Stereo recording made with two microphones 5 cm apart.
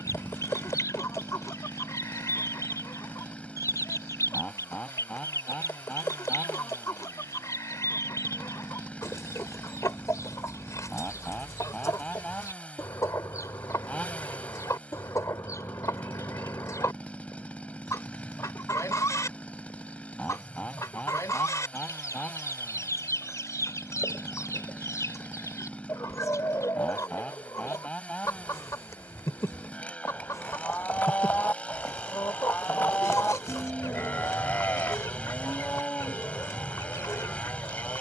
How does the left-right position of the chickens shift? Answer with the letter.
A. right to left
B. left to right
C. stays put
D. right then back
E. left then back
C.